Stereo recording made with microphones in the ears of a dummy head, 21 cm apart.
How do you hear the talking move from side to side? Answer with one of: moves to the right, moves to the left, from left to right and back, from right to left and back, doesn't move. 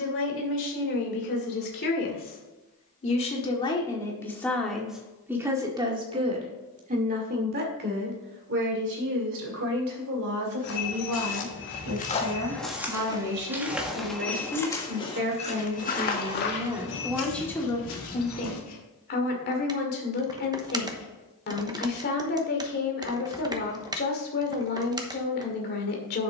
from left to right and back.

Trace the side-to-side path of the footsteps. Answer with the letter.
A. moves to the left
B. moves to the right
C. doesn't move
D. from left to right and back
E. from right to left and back
D.